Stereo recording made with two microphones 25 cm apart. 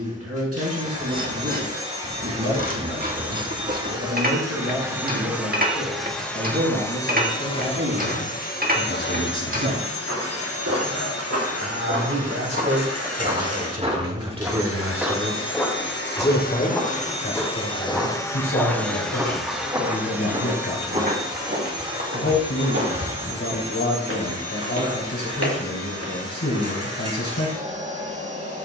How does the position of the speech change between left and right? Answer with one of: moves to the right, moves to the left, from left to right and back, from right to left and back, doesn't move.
moves to the left.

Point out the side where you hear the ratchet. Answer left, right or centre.
right.